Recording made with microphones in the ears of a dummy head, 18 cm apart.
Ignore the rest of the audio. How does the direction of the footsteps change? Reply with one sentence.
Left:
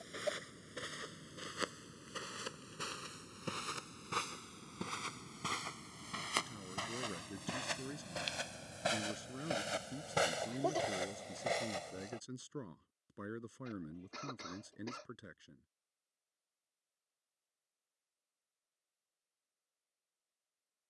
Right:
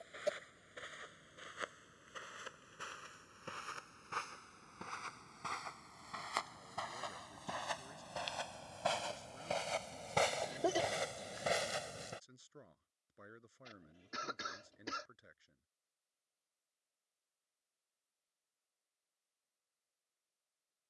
You can hear the footsteps move from left to right.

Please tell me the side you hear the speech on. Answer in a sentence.
You can hear the speech on the left.